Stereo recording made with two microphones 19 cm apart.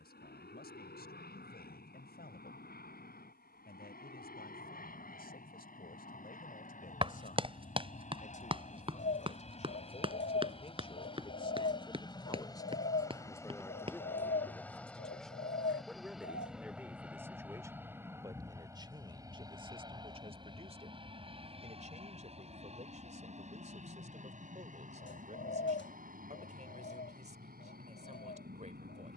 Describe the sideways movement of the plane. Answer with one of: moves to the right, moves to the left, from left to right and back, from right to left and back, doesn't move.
moves to the right.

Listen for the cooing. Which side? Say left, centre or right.
left.